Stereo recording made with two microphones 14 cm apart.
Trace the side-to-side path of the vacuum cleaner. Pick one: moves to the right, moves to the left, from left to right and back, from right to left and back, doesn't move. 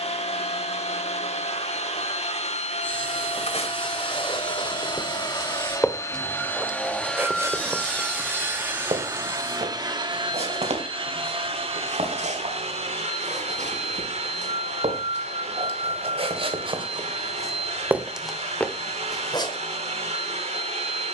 moves to the right.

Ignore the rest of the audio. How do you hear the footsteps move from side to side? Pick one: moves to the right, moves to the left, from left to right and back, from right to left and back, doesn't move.
from left to right and back.